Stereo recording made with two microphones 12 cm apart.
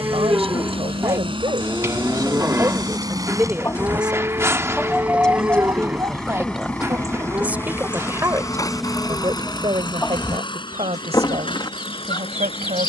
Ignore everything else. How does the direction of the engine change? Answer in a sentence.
You can hear the engine move from right to left.